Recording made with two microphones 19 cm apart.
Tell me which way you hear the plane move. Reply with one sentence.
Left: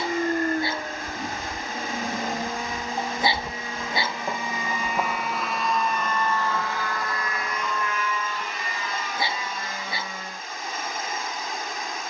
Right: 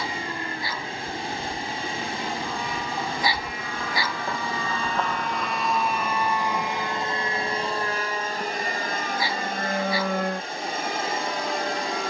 You can hear the plane go from the left side to the right.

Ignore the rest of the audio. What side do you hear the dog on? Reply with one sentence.
In this clip you hear the dog on the left.